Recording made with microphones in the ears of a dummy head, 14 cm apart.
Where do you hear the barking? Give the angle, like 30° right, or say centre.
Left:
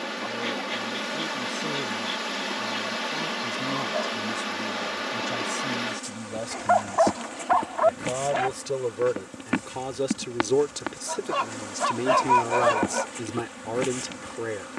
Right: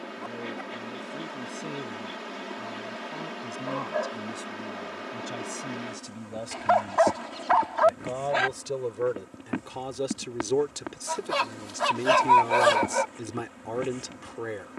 60° right.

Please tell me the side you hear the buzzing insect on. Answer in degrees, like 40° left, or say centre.
70° left.